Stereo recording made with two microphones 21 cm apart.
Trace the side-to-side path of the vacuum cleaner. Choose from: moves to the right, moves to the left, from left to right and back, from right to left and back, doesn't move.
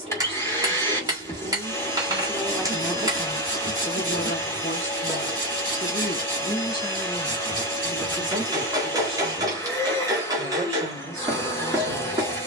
doesn't move.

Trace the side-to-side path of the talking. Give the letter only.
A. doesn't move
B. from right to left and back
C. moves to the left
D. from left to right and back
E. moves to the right
B.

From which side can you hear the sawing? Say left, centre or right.
right.